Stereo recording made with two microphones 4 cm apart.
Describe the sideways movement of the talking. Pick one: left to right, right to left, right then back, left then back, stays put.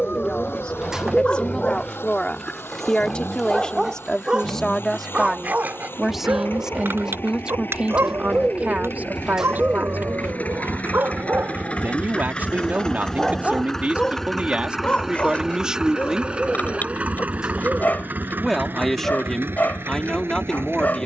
right then back.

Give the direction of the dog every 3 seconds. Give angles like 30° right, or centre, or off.
30° left, 20° right, 60° right, 50° right, centre, 40° left, 40° left.